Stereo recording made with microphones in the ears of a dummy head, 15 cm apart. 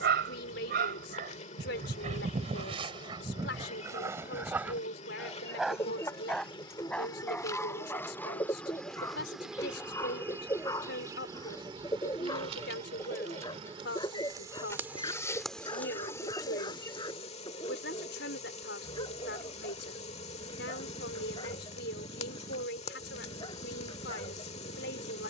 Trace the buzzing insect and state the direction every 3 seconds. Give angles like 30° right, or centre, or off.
40° left, 40° left, 20° left, 10° right, 30° right, 20° left, 40° left, 40° left, 40° left.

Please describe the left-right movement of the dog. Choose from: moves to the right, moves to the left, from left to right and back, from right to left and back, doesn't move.
moves to the left.